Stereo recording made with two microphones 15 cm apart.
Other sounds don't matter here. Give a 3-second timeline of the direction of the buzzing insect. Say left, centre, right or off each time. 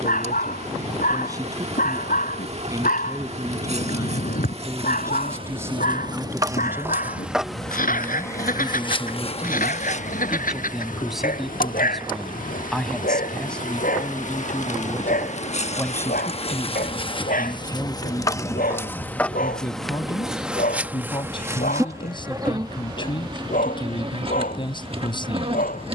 right, right, centre, left, left, left, centre, right, right.